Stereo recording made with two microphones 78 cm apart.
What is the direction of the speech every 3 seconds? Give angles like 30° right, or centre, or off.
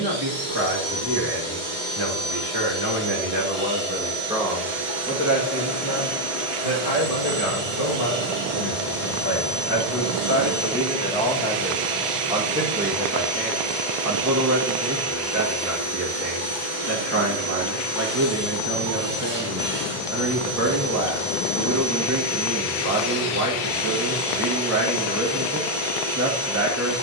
30° right, centre, 40° left, 20° left, 20° right, 20° right, 20° right, 20° right, 20° right.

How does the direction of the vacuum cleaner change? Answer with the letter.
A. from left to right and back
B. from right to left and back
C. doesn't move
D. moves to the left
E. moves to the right
C.